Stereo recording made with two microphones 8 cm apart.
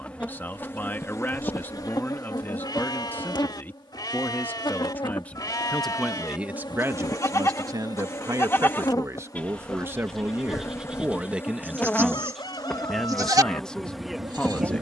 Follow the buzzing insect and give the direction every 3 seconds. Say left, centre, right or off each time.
left, left, left, left, centre.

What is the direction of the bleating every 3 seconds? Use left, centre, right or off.
left, left, left, centre, right.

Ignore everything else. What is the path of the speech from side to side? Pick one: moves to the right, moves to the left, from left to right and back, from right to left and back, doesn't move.
from left to right and back.